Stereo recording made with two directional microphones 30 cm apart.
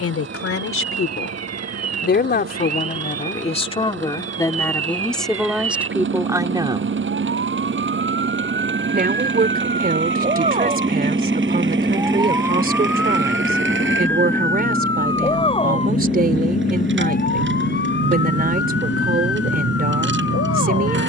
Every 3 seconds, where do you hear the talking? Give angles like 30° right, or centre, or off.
40° left, 10° left, 10° right, 30° right, 30° right, 30° right, 30° right.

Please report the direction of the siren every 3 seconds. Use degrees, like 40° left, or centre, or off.
60° right, 50° right, 40° right, 20° right, centre, 30° left, 40° left.